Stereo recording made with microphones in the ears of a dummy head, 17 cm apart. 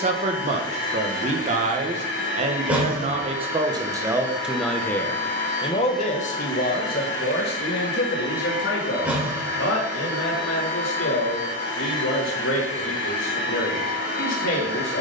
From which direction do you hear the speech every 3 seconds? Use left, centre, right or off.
right, centre, left, left, left.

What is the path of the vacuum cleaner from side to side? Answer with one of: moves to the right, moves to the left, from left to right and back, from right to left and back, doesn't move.
doesn't move.